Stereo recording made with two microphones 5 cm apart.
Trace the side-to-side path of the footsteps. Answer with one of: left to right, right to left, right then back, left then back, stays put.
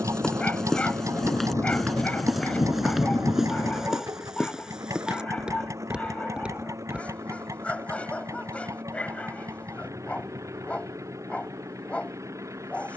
left to right.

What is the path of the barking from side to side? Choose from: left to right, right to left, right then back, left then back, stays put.
stays put.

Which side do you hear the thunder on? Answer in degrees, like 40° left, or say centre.
80° left.